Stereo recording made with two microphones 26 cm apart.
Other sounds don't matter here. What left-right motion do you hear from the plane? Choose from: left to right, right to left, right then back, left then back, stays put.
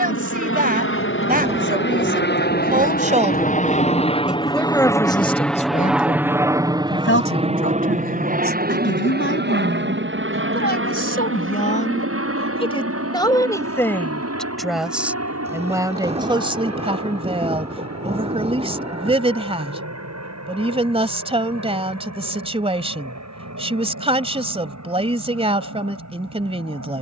left to right.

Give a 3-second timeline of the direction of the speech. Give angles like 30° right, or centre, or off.
30° right, 10° left, 50° left, 40° left, 10° left, 20° right, 20° right, 20° right, 20° right.